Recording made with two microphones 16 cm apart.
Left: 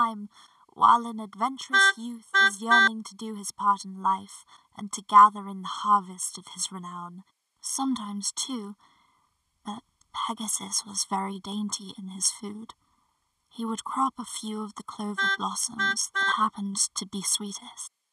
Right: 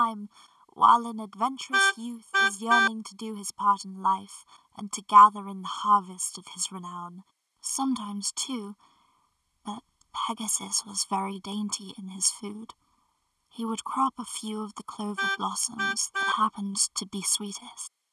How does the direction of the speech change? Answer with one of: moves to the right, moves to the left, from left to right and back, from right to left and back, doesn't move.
doesn't move.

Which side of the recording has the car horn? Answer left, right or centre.
centre.